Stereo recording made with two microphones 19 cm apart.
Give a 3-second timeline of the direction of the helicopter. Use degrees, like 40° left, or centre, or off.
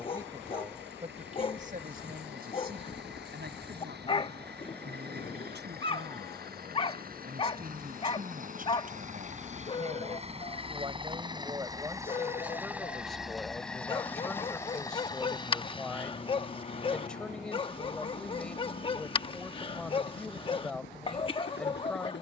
70° right, 60° right, 50° right, 30° right, centre, 30° left, 50° left, 60° left.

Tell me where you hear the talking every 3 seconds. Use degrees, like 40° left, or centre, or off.
40° right, 60° right, 50° right, 30° right, centre, centre, centre, centre.